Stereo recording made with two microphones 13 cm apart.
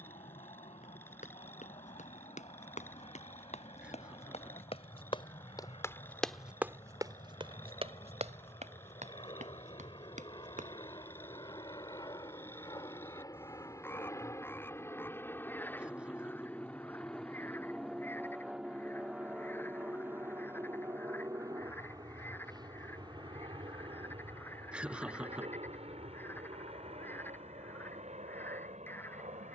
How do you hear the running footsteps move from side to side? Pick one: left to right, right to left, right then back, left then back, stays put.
left to right.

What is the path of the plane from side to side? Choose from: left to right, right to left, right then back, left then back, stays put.
left to right.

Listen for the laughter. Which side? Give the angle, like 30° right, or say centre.
10° right.